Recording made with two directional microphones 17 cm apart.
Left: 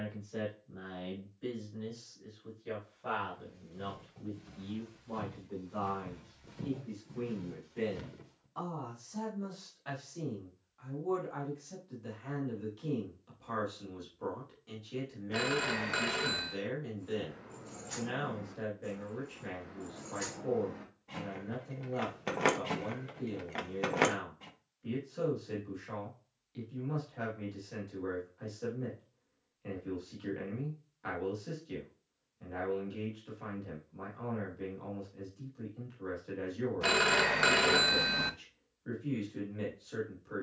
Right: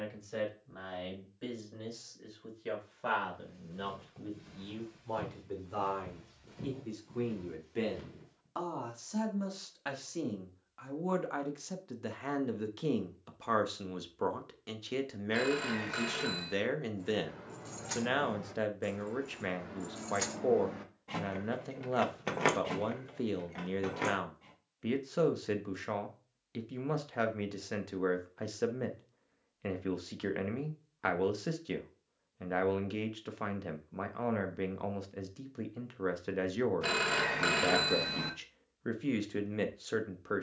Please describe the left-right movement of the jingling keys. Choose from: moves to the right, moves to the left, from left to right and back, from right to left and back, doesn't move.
moves to the left.